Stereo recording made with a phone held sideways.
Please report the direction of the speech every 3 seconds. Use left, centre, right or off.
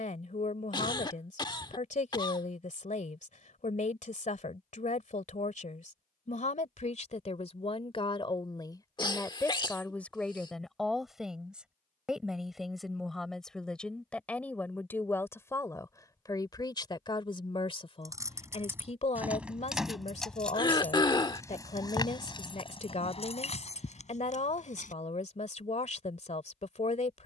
left, left, left, centre, centre, left, left, left, left.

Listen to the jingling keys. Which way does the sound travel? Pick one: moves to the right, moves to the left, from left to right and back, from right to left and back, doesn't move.
moves to the left.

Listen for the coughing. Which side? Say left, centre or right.
left.